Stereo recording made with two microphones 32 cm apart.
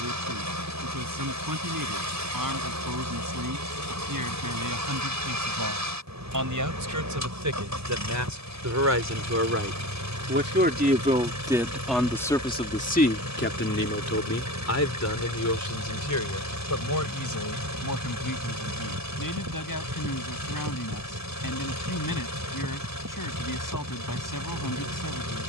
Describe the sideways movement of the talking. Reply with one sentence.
In this clip you hear the talking travel towards the left.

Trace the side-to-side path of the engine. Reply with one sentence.
In this clip you hear the engine stay in one place.